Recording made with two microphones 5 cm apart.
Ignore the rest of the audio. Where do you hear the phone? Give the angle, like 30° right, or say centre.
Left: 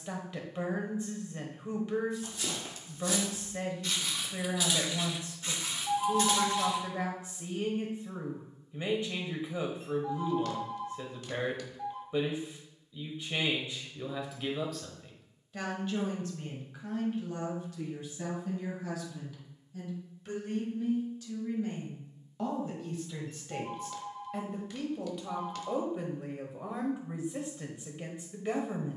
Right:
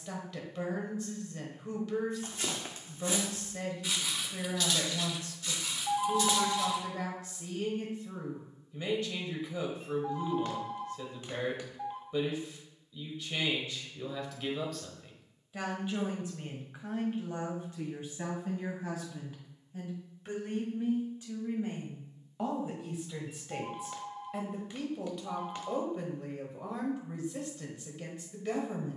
20° right.